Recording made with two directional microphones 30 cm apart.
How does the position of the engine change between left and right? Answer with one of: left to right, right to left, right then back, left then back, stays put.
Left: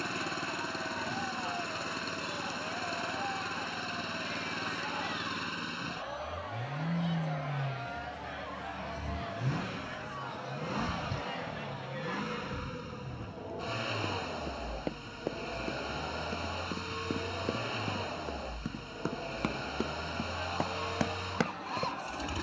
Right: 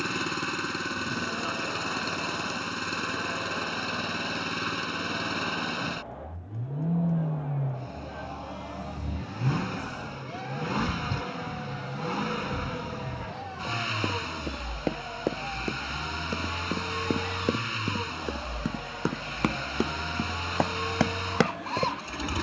stays put.